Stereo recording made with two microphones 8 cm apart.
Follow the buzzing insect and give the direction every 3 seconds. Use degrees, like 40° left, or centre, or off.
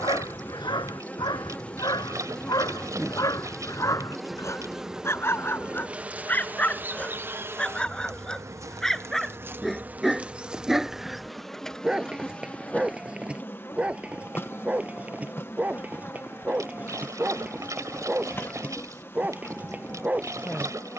20° left, centre, 30° right, 10° right, 20° left, 30° left, 30° left.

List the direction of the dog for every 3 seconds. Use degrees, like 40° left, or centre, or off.
60° left, 40° left, 10° left, centre, 10° right, 20° right, 20° right.